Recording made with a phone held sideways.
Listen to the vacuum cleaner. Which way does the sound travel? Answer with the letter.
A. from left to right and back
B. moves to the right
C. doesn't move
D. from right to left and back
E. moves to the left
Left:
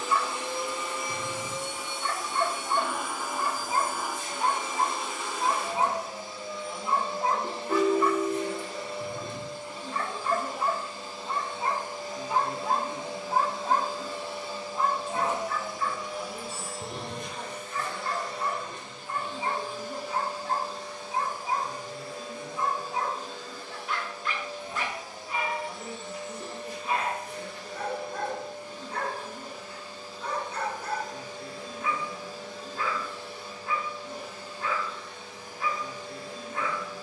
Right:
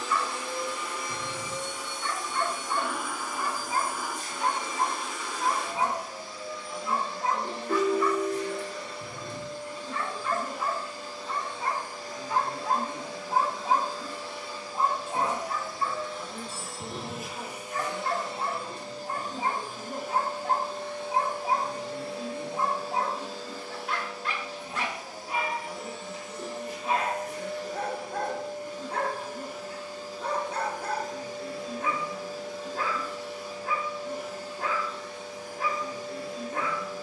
B.